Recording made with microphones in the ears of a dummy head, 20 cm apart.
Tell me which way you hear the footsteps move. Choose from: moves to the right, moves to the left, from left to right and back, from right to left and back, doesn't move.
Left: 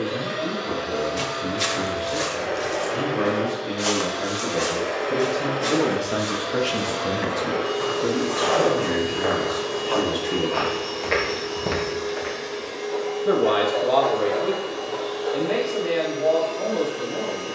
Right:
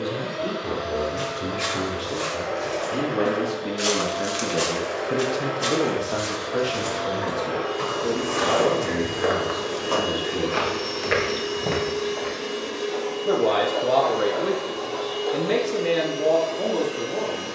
from left to right and back.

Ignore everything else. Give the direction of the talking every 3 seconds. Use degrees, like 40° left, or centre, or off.
60° right, 30° right, 40° left, 60° left, 10° right, 50° right.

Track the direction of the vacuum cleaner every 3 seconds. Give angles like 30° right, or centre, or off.
70° left, 60° left, 30° left, 20° right, 50° right, 70° right.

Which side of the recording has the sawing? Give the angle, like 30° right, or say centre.
70° left.